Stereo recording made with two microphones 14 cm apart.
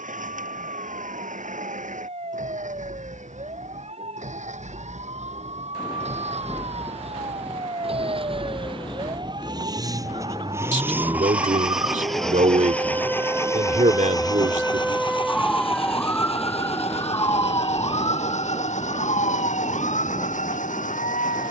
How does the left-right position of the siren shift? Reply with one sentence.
You can hear the siren travel towards the left.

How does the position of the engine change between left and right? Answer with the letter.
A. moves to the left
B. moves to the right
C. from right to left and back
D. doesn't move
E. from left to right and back
A.